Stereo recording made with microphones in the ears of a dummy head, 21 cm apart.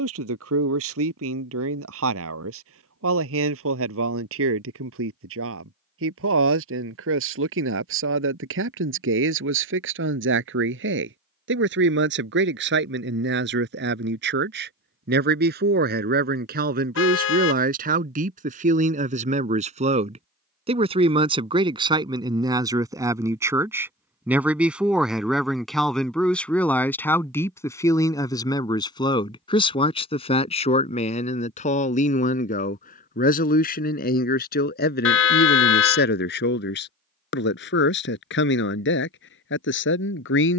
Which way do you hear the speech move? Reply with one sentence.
In this clip you hear the speech move from right to left.